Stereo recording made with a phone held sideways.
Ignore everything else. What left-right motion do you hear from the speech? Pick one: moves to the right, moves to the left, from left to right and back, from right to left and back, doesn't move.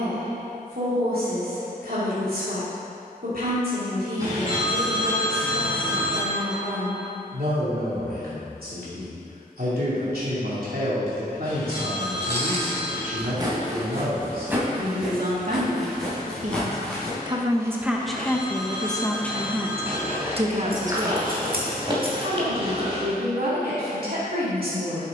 from right to left and back.